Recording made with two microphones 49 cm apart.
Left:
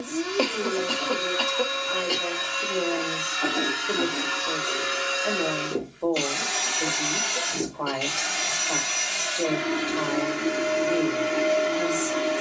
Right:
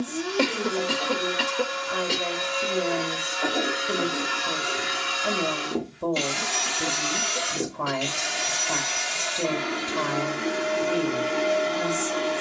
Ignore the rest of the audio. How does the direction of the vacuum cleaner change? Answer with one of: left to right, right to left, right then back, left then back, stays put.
right then back.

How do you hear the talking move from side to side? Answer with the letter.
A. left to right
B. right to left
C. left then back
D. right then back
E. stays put
E.